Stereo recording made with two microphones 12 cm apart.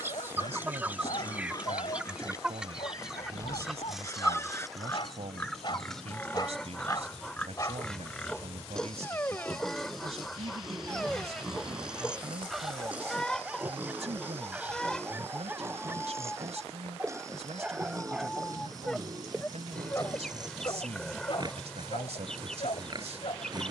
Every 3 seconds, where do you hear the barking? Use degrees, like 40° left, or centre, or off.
60° left, 50° left, 30° left, 10° left, 10° right, 20° right, 10° left, 50° left.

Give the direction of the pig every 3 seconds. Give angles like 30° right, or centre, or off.
30° left, 20° left, 10° left, centre, 10° right, 20° right, 30° right, 40° right.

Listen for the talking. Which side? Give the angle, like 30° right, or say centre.
70° right.